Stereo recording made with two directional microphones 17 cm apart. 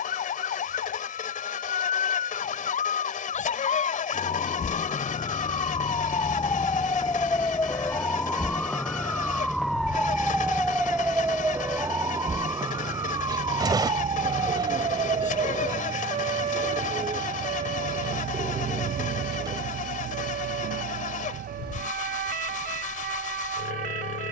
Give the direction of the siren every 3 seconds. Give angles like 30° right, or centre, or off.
50° left, 40° left, 20° left, centre, 20° right, 40° right, 50° right, 60° right.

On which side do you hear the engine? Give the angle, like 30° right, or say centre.
50° left.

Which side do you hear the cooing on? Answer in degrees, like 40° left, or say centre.
20° right.